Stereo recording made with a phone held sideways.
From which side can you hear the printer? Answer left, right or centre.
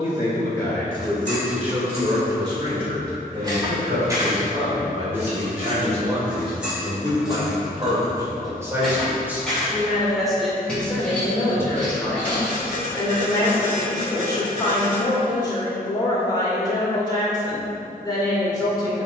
right.